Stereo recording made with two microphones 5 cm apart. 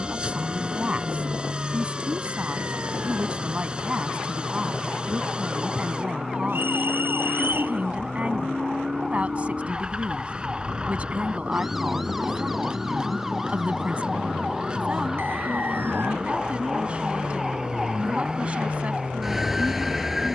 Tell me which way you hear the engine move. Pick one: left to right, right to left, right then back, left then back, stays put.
stays put.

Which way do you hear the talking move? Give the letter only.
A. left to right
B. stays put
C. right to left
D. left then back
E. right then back
B.